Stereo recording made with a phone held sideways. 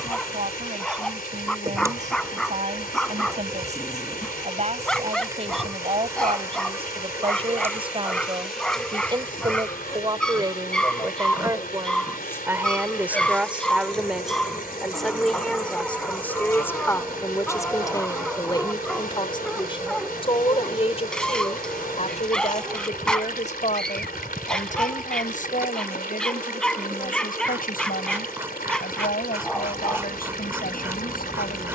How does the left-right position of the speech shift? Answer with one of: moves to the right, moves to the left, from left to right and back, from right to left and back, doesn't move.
moves to the left.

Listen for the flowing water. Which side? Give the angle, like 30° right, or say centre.
70° left.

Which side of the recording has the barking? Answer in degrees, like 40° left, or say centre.
10° left.